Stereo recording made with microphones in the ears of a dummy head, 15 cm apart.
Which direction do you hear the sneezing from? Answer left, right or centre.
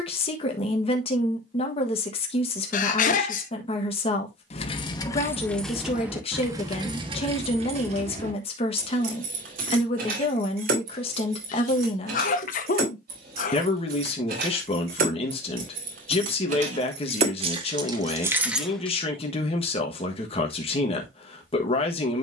left.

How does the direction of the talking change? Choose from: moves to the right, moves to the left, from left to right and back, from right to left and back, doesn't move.
doesn't move.